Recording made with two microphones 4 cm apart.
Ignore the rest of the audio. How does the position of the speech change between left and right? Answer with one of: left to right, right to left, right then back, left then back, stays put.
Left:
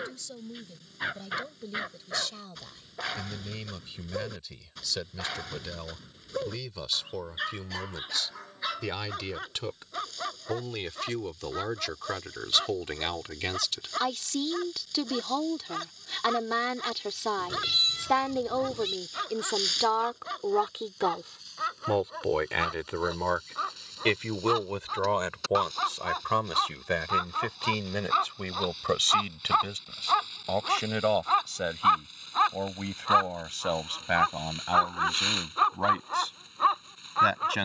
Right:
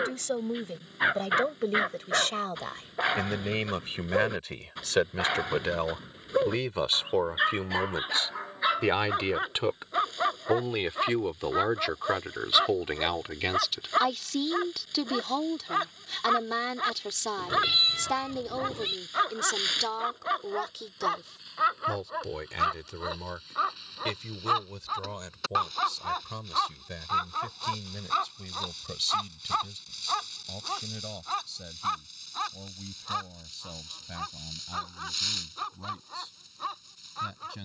right to left.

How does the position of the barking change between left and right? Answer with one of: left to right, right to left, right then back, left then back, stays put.
right to left.